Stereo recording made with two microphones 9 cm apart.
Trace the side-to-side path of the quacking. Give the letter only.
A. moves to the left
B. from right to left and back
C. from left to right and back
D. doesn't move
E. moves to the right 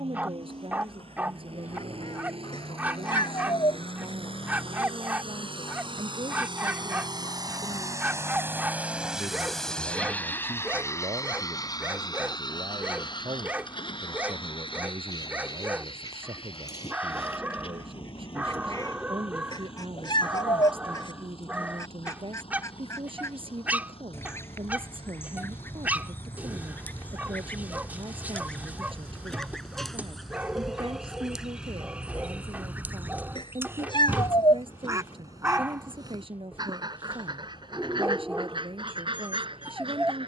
E.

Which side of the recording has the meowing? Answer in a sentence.
You can hear the meowing on the left.